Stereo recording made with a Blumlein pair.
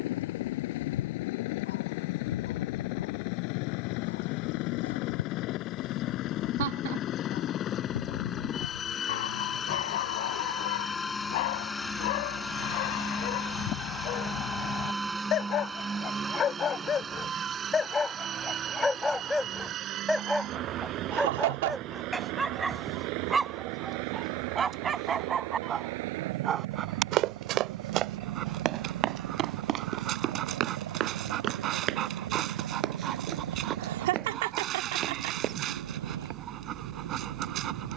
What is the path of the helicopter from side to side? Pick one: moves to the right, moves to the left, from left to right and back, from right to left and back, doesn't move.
moves to the right.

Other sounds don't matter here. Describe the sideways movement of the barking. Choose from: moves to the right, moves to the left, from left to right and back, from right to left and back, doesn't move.
moves to the right.